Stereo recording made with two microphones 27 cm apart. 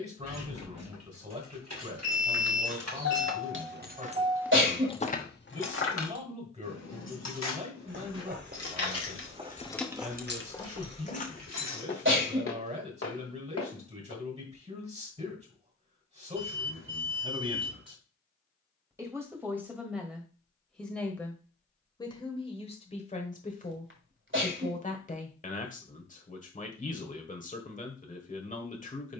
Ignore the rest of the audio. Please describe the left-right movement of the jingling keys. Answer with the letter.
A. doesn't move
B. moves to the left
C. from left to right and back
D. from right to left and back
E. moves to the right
D.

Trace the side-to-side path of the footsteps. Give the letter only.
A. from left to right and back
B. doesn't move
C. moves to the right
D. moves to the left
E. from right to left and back
D.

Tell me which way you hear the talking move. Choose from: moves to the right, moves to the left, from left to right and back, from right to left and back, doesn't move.
moves to the left.